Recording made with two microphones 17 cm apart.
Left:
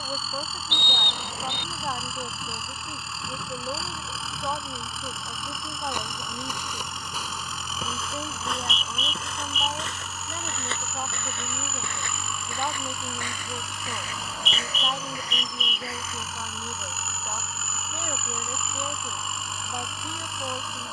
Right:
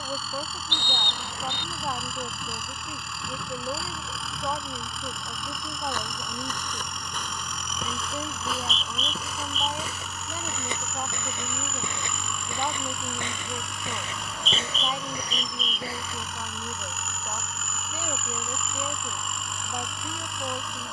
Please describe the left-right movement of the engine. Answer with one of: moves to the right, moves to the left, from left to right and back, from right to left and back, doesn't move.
doesn't move.